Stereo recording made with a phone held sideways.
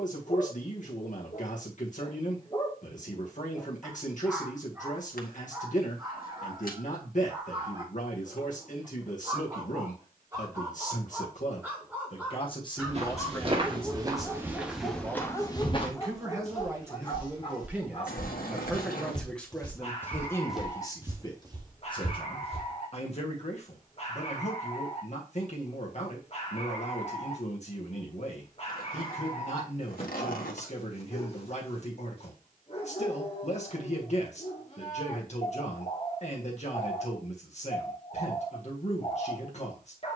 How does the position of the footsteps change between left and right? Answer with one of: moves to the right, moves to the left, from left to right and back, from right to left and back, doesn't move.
from right to left and back.